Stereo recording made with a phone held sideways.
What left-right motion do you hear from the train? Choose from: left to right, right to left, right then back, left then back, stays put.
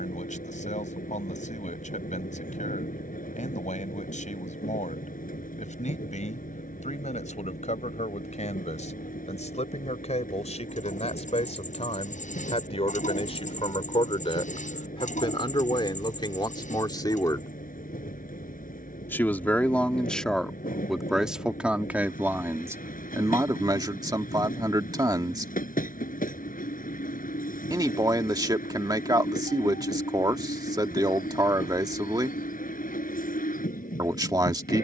stays put.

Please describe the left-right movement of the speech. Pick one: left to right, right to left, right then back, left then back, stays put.
left to right.